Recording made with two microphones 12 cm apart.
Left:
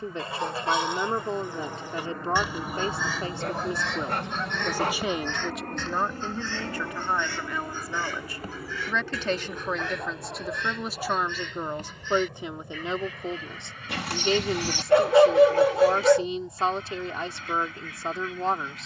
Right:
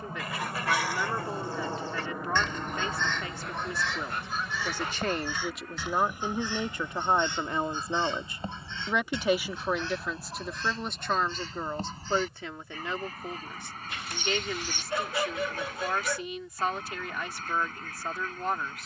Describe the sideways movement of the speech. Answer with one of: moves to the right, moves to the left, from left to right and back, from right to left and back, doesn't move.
from left to right and back.